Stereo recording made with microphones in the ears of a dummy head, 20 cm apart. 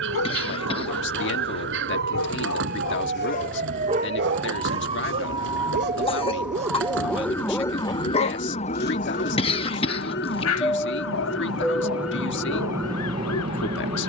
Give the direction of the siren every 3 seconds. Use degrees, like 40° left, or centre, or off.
50° right, 30° right, 10° left, 50° left, 70° left.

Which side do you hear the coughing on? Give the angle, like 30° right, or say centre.
30° left.